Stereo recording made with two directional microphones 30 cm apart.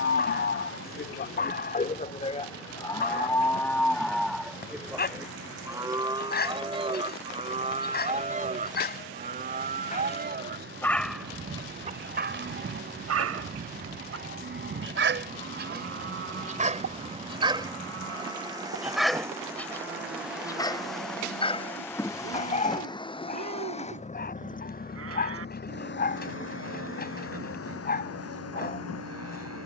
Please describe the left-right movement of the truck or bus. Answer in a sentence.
In this clip you hear the truck or bus move to the left.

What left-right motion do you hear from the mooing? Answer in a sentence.
In this clip you hear the mooing go from the left side to the right.